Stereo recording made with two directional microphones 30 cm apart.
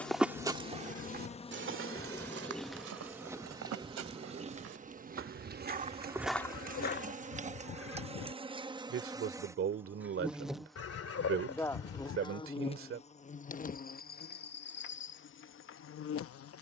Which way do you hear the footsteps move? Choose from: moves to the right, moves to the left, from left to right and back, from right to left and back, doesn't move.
from left to right and back.